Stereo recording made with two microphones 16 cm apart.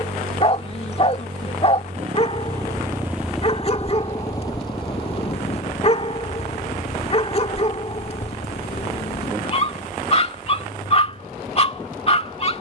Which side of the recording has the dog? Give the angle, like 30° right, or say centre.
40° left.